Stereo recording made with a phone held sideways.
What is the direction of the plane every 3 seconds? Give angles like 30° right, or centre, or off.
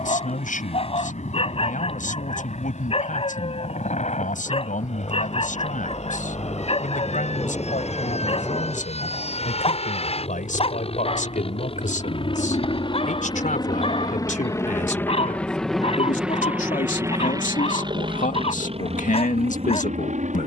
70° left, 70° left, 60° left, 50° left, 30° left, 10° right, 50° right.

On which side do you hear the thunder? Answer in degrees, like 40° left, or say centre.
30° left.